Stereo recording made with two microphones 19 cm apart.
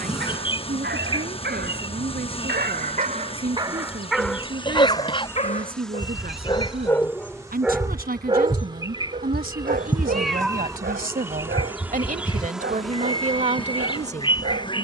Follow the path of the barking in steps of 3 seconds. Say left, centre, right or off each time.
right, centre, centre, right, right.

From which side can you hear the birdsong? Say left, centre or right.
left.